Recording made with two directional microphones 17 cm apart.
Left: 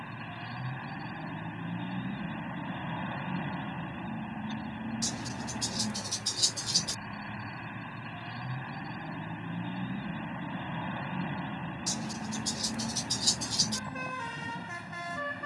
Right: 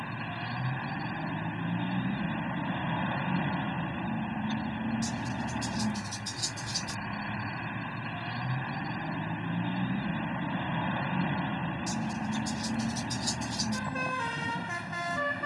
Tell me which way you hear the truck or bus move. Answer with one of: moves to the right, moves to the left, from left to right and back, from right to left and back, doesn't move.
doesn't move.